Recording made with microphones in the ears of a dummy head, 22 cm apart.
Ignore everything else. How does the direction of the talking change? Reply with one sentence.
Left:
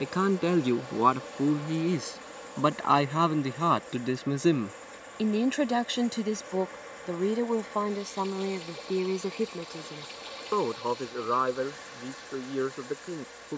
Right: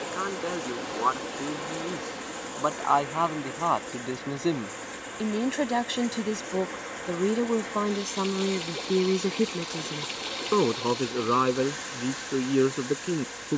You can hear the talking move from left to right.